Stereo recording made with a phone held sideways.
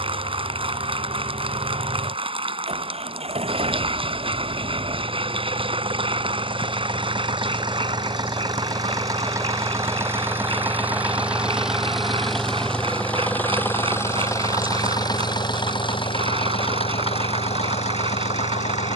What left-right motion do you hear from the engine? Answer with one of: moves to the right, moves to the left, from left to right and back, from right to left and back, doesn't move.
moves to the left.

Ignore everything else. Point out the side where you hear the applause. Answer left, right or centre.
right.